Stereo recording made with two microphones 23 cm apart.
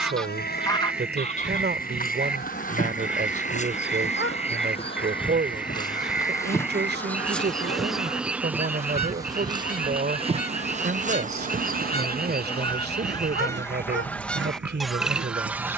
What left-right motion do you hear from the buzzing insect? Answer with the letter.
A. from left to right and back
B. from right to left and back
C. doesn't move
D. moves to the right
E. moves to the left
D.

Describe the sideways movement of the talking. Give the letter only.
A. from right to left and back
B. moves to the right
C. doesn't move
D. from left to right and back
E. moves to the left
C.